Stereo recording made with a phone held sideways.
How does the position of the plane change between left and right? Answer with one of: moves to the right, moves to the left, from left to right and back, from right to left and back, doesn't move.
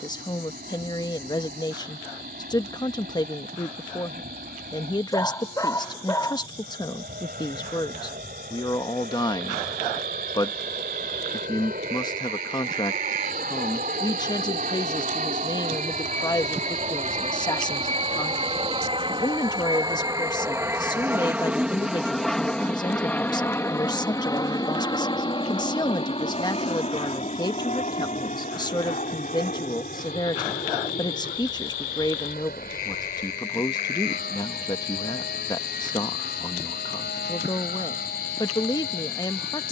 moves to the left.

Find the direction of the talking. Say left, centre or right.
left.